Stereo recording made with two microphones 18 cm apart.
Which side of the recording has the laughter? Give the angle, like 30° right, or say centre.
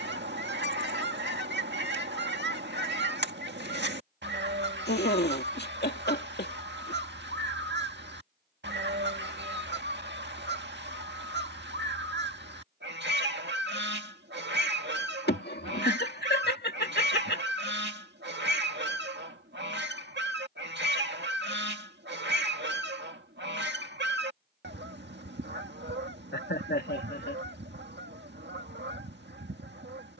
70° left.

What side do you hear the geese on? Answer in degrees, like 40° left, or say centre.
80° right.